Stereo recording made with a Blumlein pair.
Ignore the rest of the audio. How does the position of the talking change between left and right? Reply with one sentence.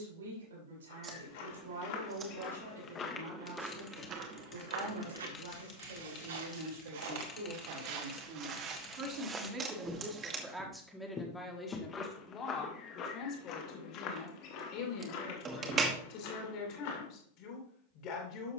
In this clip you hear the talking travel towards the left.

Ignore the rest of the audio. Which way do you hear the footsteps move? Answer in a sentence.
You can hear the footsteps move from left to right and back again.